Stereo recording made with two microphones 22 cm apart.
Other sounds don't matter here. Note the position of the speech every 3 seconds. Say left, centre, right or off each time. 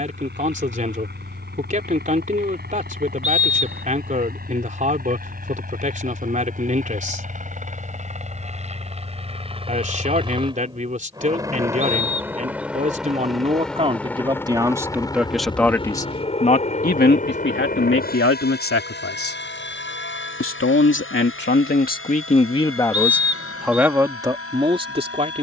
right, right, right, right, right, left, left, left, right.